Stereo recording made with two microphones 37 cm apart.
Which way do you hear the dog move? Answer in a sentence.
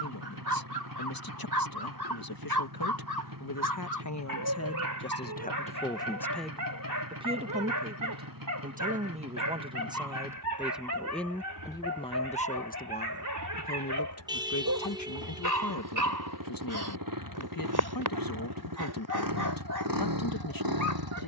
You can hear the dog stay put.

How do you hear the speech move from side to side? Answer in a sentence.
You can hear the speech move from left to right and back again.